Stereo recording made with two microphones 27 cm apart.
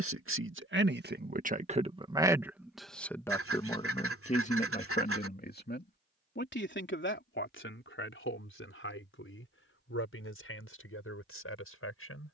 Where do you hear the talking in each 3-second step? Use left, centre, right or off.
right, left, left, left.